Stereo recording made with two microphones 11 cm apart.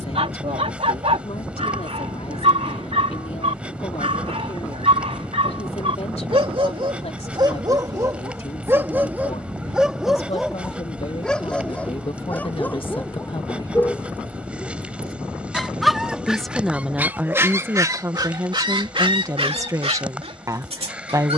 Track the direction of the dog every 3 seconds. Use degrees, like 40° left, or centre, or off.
70° right, 70° right, 40° right, centre, 20° left, 10° right, 50° right.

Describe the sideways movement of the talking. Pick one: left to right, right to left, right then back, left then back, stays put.
left to right.